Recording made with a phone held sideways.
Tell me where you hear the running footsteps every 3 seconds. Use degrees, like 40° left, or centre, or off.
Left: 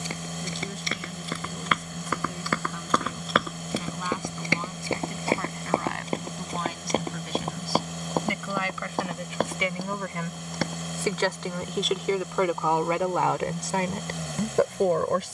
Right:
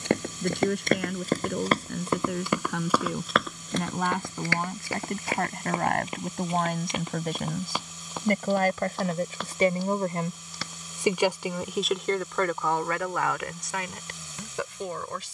40° right, 20° left, 40° left, 50° left, off.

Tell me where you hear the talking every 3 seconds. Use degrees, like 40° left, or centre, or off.
70° right, 60° right, 50° right, 20° right, 30° left.